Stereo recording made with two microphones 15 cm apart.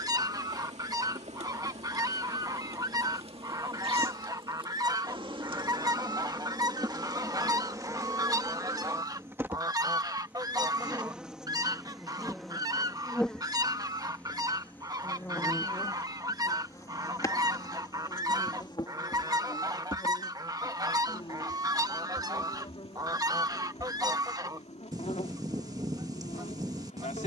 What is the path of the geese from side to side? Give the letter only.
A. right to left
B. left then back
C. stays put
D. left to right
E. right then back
C.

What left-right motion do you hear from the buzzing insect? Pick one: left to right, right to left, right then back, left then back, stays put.
right to left.